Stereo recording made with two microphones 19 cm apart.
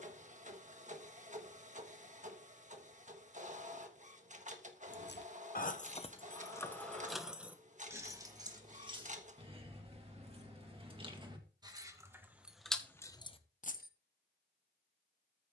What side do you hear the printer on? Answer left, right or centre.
right.